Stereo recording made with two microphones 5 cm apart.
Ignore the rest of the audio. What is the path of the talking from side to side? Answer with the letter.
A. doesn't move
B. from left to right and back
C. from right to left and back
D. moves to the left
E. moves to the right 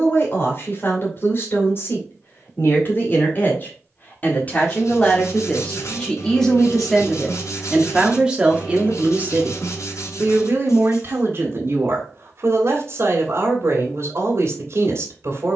E.